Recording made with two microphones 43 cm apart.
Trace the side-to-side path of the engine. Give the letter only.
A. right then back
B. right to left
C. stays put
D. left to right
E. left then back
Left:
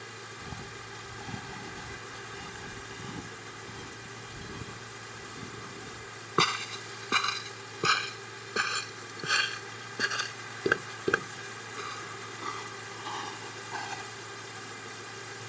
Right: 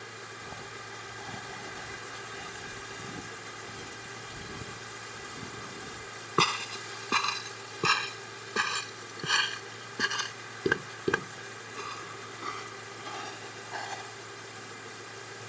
C.